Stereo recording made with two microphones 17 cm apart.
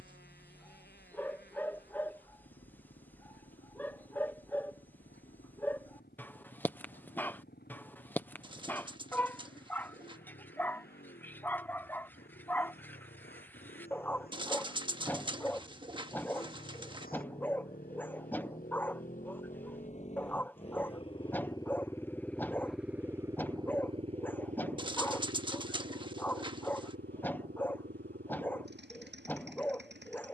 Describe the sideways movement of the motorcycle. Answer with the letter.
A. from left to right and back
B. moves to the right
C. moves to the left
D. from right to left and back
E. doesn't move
B.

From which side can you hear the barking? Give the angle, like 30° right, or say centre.
10° left.